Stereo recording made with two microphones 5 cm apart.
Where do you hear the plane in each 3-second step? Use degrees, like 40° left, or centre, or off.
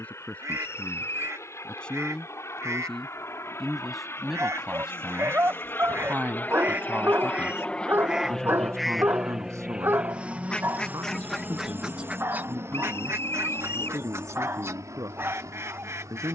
70° left, 50° left, 20° left, 20° right, 50° right, 60° right.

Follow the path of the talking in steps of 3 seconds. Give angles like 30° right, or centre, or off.
20° left, 10° right, 50° right, 70° right, 80° right, 80° right.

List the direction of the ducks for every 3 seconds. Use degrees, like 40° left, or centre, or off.
60° right, 60° right, 20° right, centre, 50° right, 60° right.